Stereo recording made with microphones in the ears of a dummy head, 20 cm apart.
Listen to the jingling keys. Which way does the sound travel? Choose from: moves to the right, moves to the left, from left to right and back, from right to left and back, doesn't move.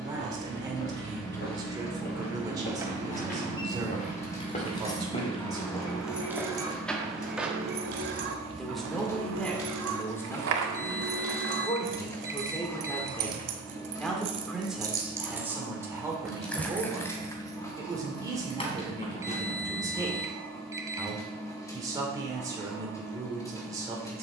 from left to right and back.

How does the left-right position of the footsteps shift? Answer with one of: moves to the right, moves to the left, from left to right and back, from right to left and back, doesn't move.
moves to the right.